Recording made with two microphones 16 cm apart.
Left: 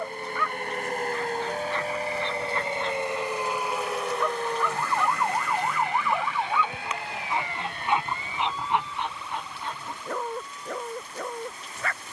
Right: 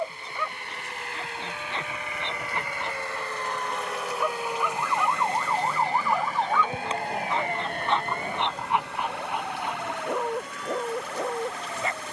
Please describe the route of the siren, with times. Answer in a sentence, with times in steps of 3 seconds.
In this clip you hear the siren on the left from 0 s, in the centre from 3 s and on the right from 6 s.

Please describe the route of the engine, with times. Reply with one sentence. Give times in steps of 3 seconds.
In this clip you hear the engine on the left from 0 s, in the centre from 3 s and on the right from 6 s.